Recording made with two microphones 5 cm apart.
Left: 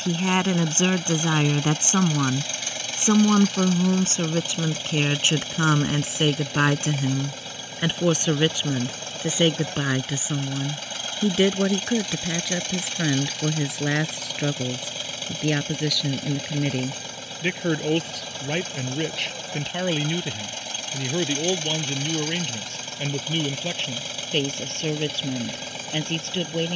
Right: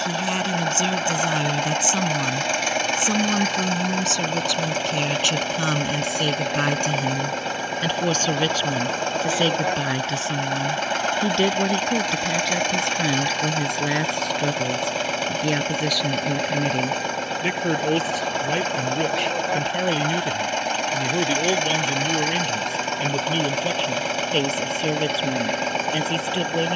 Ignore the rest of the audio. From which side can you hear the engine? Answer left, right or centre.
right.